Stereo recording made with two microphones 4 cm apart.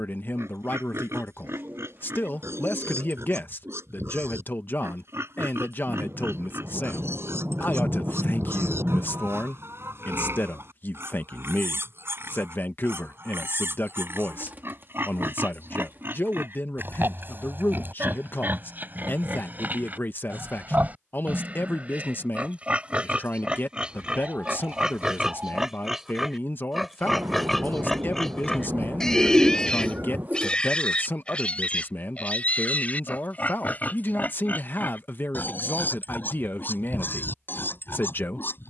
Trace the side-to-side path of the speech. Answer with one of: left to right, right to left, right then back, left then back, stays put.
stays put.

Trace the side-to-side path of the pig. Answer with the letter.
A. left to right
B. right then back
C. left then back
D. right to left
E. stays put
D.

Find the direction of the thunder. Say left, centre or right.
right.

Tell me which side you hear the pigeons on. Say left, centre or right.
right.